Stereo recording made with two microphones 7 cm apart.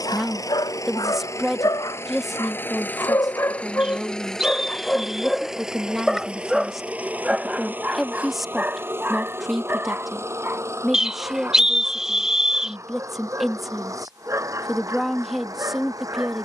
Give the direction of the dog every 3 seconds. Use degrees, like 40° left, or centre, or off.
70° left, 20° left, 20° right, 30° right, 40° right, 40° right.